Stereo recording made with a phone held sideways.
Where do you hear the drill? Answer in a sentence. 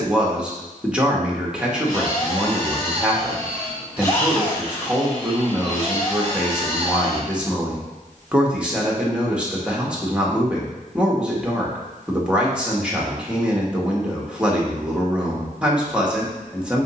You can hear the drill on the left.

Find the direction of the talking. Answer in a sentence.
You can hear the talking in the centre.